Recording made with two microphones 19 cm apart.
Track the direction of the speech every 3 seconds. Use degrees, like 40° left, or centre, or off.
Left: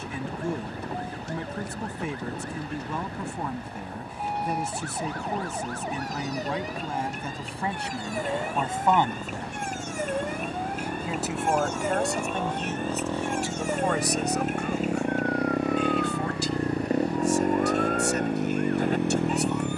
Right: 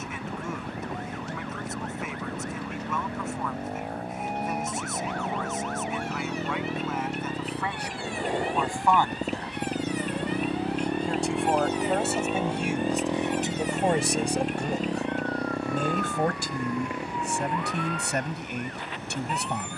30° left, 30° left, 30° left, 10° left, 20° right, 60° right, 70° right.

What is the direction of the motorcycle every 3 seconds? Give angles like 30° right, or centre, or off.
50° right, 50° right, 40° right, 30° right, 10° right, 30° left, 60° left.